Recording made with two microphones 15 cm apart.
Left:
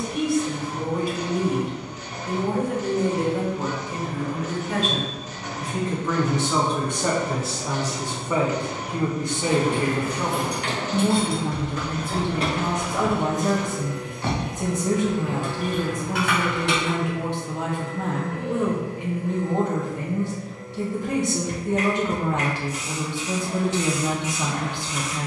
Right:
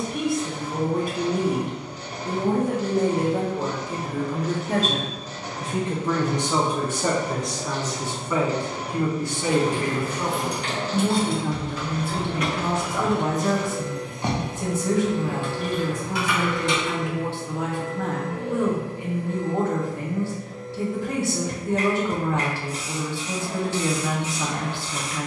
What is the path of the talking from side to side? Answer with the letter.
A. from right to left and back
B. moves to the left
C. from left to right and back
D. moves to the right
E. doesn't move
B.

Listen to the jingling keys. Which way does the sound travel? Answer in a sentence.
You can hear the jingling keys go right and come back.